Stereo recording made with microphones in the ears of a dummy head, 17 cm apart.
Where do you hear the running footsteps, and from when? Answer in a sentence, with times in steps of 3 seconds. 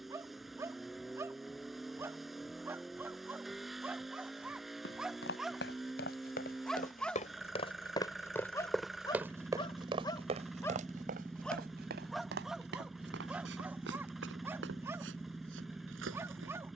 In this clip you hear the running footsteps not at all from 0 s, on the left from 3 s and on the right from 9 s.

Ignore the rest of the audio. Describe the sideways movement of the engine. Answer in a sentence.
You can hear the engine stay put.